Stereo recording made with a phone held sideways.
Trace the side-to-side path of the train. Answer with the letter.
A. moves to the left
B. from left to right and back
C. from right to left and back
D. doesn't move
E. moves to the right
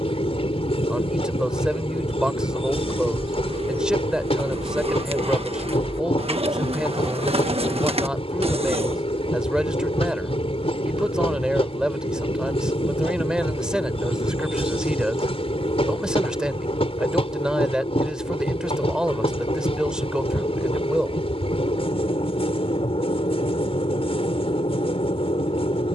D.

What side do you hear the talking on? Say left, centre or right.
centre.